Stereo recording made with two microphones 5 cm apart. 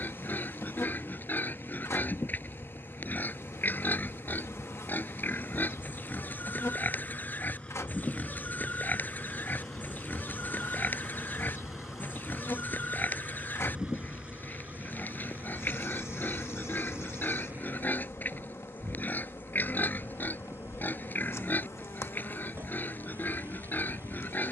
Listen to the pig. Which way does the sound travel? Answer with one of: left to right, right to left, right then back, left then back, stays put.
stays put.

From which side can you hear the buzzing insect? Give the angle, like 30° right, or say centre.
70° left.